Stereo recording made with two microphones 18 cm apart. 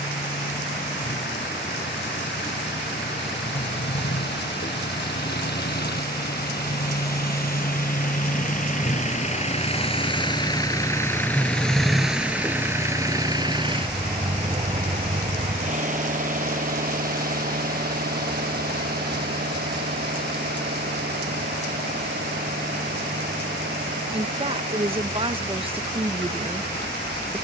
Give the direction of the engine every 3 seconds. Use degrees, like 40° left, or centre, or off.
80° left, 70° left, 50° left, 20° left, 20° right, 50° right, 60° right, 70° right, 70° right.